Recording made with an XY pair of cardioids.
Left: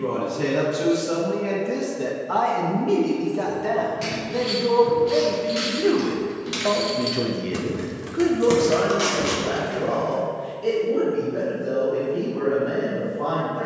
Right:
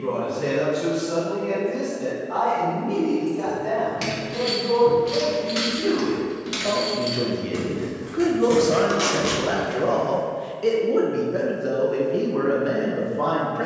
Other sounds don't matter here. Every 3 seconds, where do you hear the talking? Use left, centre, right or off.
left, left, centre, right, right.